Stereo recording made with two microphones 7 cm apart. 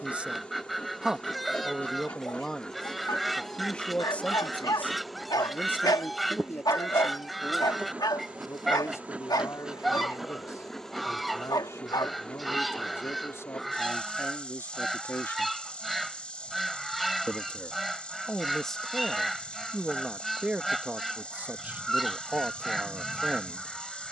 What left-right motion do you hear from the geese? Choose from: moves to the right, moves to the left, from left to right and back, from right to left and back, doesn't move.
doesn't move.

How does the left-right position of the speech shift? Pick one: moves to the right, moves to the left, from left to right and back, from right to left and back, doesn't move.
from right to left and back.